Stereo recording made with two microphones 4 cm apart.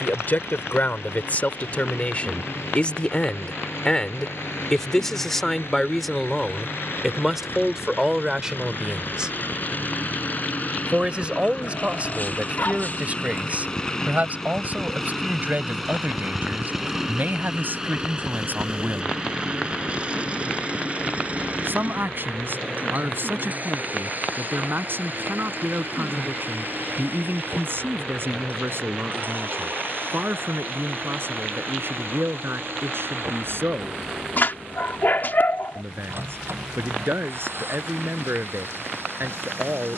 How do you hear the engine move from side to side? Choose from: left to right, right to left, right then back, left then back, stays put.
left to right.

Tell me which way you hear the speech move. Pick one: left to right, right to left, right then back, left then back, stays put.
left to right.